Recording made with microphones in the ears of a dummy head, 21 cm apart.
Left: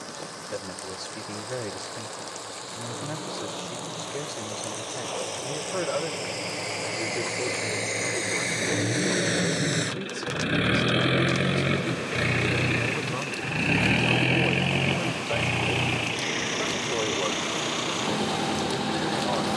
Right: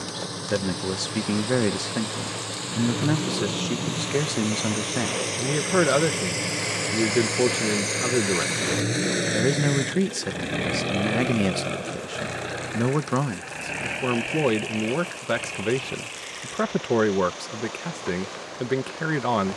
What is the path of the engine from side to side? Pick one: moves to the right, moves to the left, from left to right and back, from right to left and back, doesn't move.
moves to the left.